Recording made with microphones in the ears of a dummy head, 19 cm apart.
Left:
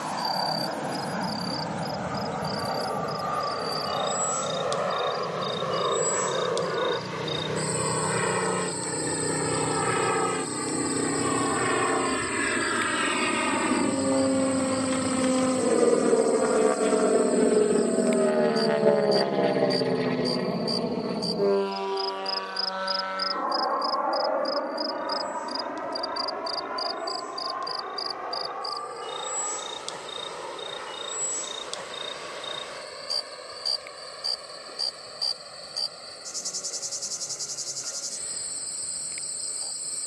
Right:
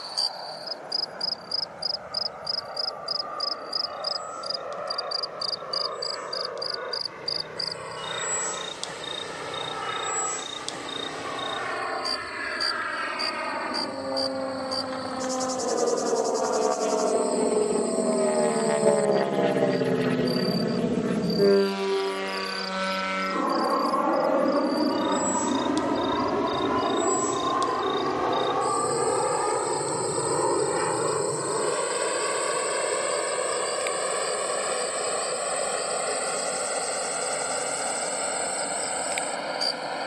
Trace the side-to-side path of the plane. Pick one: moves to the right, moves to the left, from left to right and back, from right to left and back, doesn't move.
moves to the right.